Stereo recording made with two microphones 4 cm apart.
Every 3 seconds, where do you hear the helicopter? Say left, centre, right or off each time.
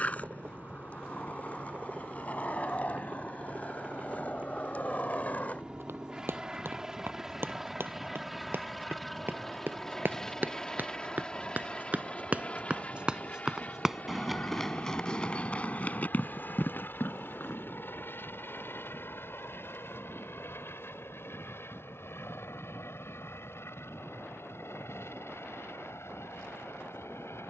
right, right, centre, centre, left, left, left, left, left.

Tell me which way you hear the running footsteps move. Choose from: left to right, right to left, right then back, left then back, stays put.
right to left.